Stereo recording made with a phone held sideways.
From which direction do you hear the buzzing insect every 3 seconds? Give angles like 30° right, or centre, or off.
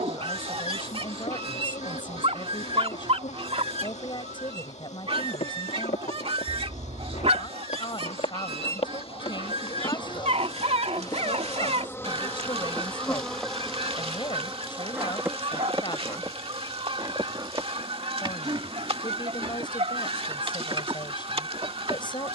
60° left, 60° left, 50° left, 30° left, centre, 20° right, 40° right, 40° right.